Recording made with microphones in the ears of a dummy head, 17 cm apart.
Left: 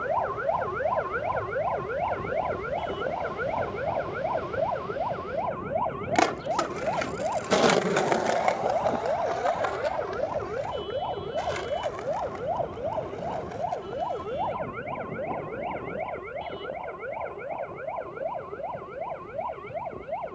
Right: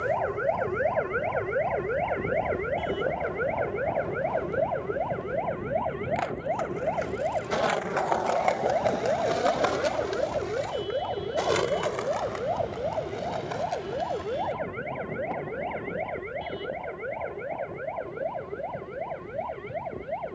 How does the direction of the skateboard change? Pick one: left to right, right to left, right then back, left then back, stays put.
left to right.